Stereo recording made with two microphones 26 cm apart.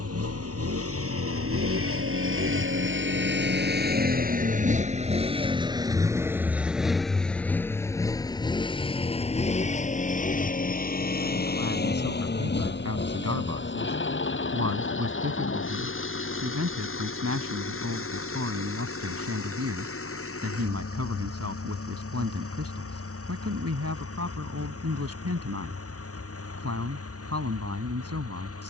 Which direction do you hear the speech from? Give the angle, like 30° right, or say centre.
70° right.